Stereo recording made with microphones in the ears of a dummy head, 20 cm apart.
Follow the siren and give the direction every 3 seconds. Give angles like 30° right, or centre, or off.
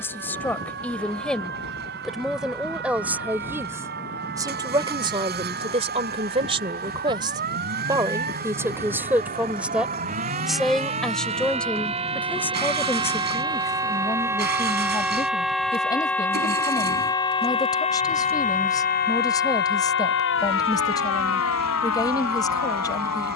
50° right, 50° right, 40° right, 30° right, 20° right, 10° left, 50° left, 70° left.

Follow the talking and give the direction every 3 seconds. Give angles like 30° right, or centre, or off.
centre, 20° right, 20° right, centre, 10° left, 20° left, 20° left, 20° left.